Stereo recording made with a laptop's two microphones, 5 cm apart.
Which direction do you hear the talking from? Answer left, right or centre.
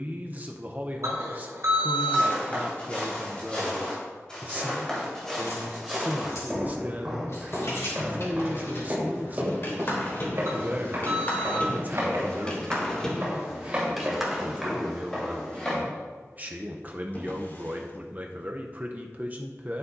right.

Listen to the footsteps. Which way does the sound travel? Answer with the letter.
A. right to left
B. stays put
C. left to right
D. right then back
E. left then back
D.